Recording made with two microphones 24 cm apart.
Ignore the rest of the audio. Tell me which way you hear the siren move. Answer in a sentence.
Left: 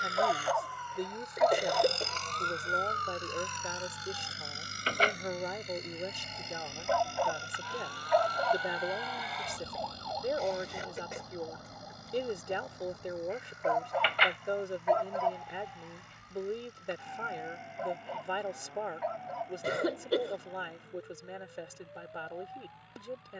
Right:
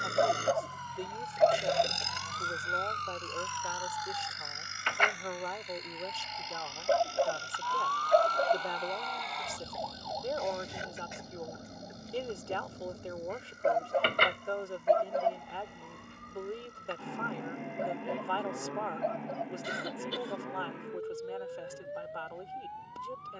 In this clip you hear the siren go from the left side to the right.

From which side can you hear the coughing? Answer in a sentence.
In this clip you hear the coughing on the left.